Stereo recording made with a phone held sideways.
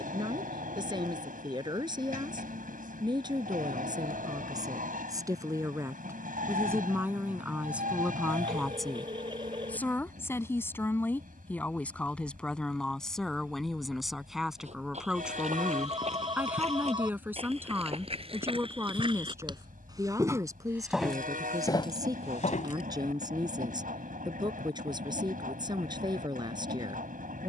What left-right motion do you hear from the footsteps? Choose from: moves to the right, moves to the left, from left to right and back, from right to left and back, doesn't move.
moves to the left.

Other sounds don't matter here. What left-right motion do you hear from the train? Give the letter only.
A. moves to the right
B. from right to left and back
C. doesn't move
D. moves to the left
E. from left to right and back
C.